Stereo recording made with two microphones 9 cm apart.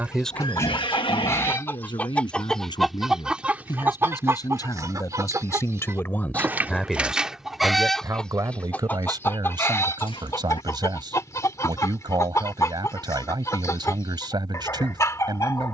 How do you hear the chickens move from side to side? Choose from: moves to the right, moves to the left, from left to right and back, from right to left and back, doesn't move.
from left to right and back.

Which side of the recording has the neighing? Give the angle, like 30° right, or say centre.
90° left.